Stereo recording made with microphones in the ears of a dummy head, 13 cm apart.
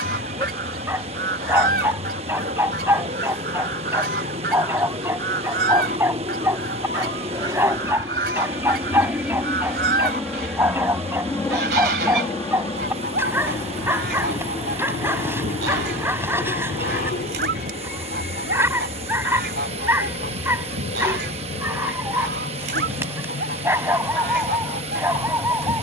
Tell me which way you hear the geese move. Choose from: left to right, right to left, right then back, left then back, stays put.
stays put.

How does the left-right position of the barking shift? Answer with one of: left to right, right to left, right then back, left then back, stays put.
stays put.